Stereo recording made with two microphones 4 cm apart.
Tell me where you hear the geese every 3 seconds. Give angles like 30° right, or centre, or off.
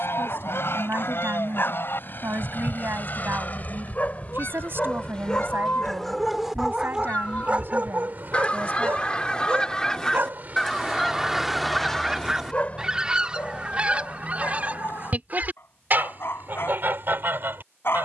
60° left, 50° left, 30° left, 10° left, 20° right, 50° right.